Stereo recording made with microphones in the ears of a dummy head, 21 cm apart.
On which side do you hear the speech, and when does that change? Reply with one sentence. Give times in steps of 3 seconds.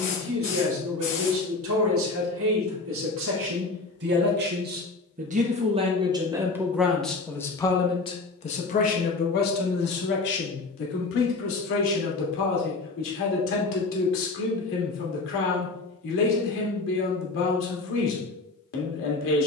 You can hear the speech on the right from 0 s, in the centre from 6 s and on the left from 9 s.